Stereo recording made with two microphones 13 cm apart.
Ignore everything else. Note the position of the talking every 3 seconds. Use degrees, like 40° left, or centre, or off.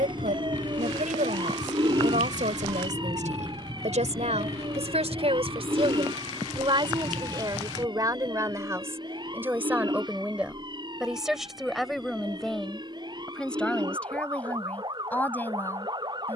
80° right, 60° right, 30° right, 10° right, 10° left, 10° left.